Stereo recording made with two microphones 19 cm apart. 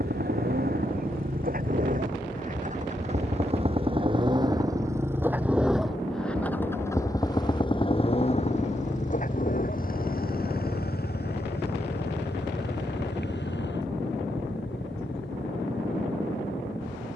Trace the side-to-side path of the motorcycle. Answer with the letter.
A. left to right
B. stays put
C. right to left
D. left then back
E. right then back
C.